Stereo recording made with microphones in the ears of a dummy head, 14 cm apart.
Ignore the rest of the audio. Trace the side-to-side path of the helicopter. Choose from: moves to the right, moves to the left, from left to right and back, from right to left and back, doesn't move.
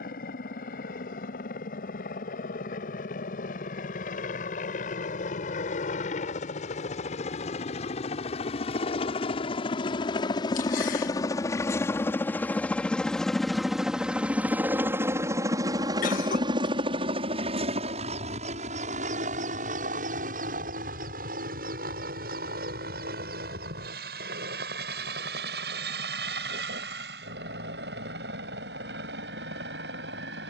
moves to the right.